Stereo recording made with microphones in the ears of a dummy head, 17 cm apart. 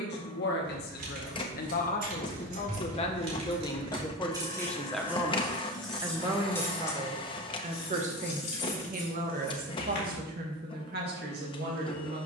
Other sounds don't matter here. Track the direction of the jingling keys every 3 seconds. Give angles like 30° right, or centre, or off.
50° right, 20° right, 30° left, 50° left.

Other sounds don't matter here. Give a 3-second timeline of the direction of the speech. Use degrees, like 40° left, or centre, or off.
50° left, 10° left, 30° right, 50° right.